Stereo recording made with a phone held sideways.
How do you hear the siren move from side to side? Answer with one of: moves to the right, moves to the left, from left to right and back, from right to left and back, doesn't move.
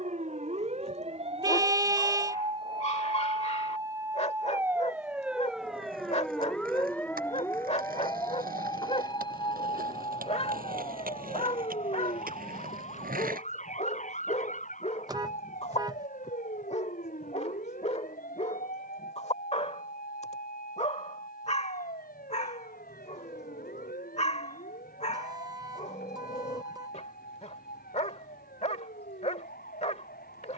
moves to the left.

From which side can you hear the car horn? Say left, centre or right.
right.